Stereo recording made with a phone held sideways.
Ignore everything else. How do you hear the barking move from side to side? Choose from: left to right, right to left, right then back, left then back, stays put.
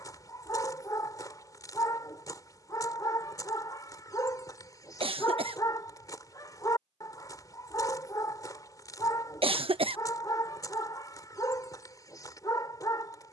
stays put.